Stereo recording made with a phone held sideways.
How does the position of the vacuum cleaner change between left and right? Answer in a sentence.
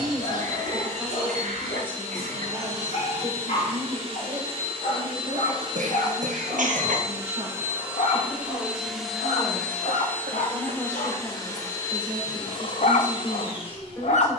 In this clip you hear the vacuum cleaner move from right to left.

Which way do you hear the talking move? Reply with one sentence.
In this clip you hear the talking go right and come back.